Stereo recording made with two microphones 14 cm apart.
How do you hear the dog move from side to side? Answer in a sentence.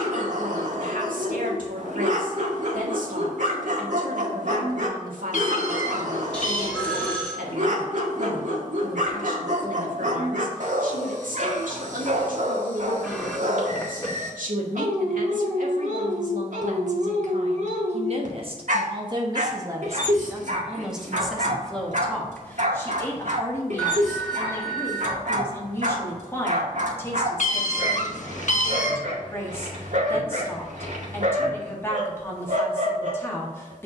You can hear the dog stay in one place.